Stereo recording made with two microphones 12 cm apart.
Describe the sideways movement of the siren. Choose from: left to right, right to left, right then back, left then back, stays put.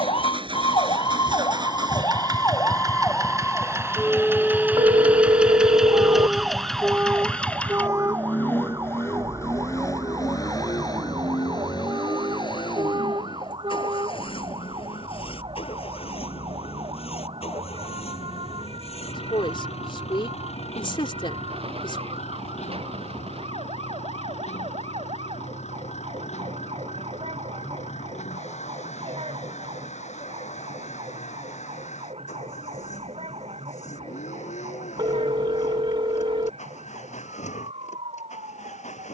left to right.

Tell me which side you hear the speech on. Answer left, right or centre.
left.